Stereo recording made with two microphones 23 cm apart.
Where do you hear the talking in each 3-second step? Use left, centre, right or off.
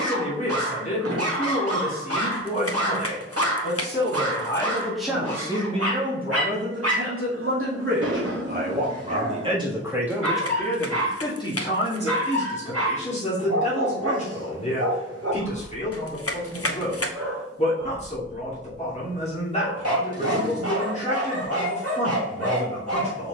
left, centre, right, centre, left, left, left, left.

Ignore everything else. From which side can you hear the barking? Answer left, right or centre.
right.